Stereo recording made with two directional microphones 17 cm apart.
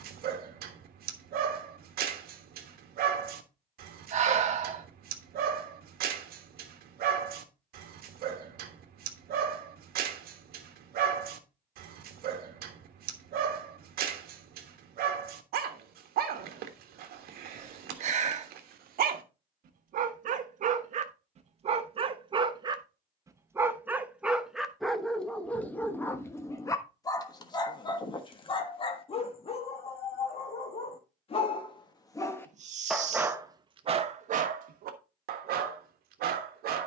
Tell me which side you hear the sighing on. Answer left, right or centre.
right.